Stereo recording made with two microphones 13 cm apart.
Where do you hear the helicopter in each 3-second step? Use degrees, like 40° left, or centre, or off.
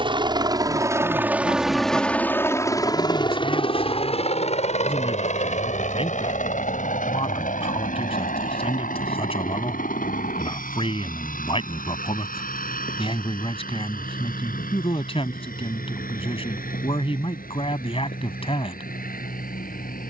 10° right, 50° left, 70° left, 70° left, 80° left, 80° left, 80° left.